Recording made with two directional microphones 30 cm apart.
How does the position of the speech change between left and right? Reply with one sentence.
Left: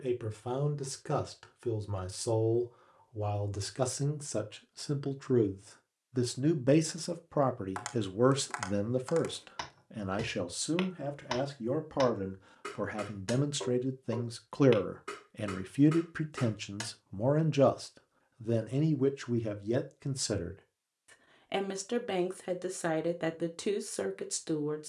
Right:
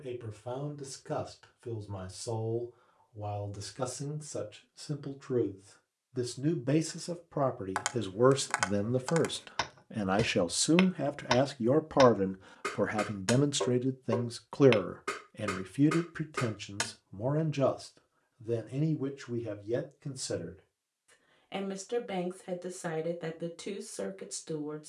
In this clip you hear the speech move from left to right and back again.